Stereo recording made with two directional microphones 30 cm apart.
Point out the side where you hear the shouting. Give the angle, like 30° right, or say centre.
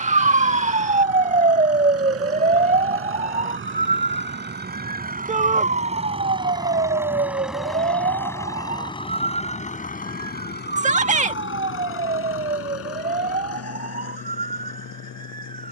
20° right.